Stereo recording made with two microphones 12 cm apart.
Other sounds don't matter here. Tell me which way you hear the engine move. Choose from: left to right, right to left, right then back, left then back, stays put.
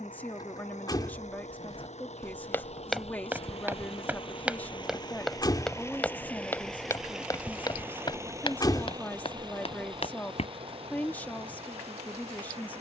left to right.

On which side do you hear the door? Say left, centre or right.
left.